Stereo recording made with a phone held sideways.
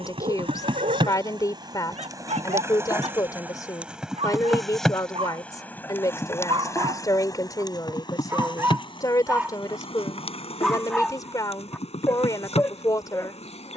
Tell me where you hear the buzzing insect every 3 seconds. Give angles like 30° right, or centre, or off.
30° right, centre, 30° left, 40° left, 50° left.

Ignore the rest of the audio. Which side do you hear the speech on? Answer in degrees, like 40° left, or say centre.
20° left.